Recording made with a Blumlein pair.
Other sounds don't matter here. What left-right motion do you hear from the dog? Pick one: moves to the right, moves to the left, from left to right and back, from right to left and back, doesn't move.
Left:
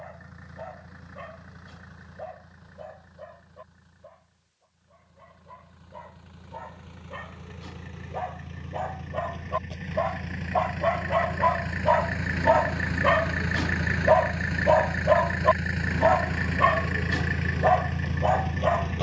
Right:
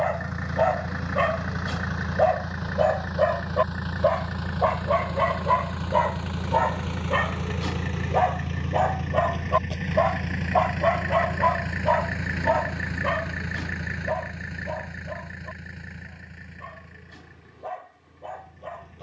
moves to the left.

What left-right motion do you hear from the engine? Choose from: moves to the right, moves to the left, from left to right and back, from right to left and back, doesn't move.
moves to the left.